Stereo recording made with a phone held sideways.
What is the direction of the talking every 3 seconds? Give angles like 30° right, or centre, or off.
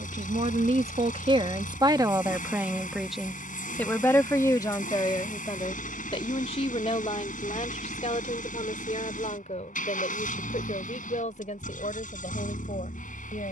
30° right, 20° left, 50° left, 60° left, 60° left.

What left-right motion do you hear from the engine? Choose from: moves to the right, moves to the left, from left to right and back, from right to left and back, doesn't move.
doesn't move.